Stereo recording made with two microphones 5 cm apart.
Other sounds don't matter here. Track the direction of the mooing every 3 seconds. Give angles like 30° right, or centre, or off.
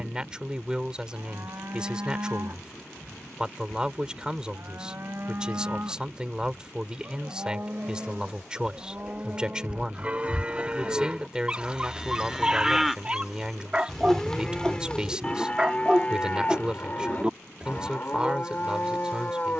60° right, 50° right, 40° right, 20° right, centre, 30° left, 30° left.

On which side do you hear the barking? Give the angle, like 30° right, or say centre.
20° right.